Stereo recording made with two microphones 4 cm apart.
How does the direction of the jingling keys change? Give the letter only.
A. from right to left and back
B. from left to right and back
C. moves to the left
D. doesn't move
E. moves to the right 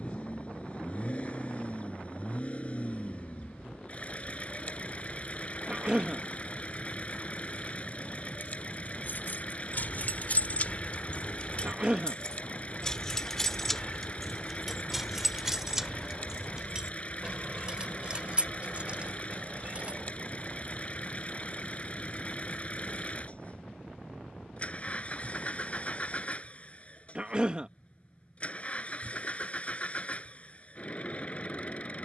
E.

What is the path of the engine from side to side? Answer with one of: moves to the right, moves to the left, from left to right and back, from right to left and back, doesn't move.
doesn't move.